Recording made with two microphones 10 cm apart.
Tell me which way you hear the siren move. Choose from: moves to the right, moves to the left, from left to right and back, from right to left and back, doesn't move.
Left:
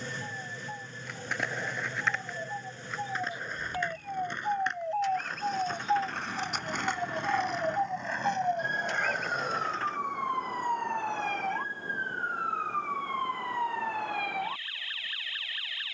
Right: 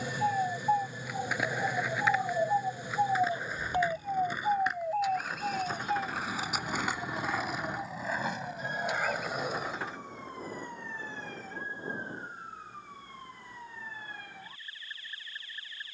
moves to the left.